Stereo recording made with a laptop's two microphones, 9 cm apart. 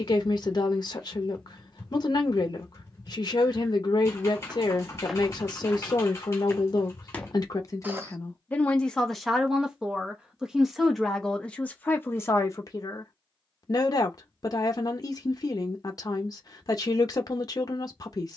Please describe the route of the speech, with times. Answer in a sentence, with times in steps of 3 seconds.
You can hear the speech on the left from 0 s, in the centre from 9 s and on the left from 12 s.